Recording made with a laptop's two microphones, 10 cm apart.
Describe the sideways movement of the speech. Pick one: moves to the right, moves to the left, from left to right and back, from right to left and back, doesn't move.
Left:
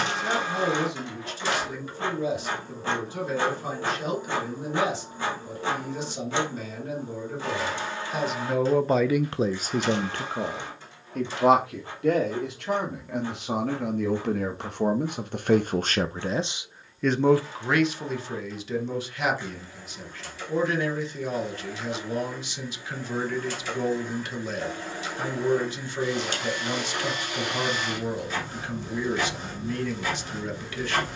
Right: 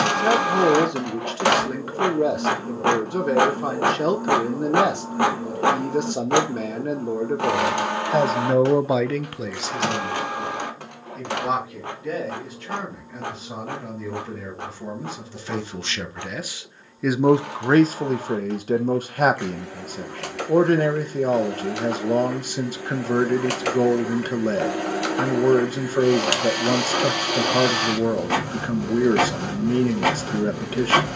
from right to left and back.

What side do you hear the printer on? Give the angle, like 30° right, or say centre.
70° right.